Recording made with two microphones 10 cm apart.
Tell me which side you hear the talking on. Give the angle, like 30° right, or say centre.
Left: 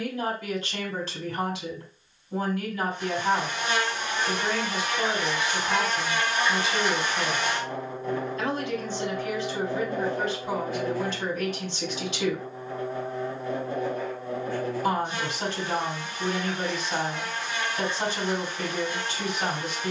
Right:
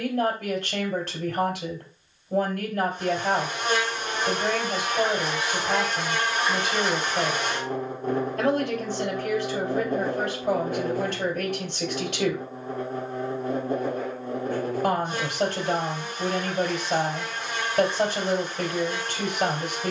60° right.